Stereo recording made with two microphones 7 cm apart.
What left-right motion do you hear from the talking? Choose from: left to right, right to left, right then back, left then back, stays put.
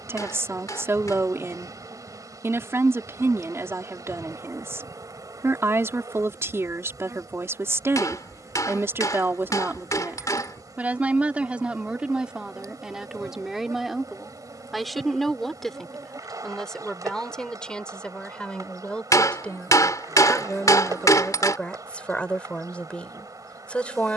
right to left.